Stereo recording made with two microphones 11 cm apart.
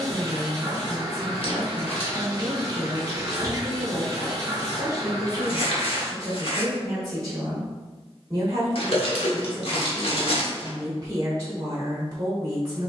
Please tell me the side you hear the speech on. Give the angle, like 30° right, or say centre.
30° right.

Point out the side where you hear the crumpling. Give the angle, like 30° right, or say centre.
60° left.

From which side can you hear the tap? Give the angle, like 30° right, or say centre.
30° right.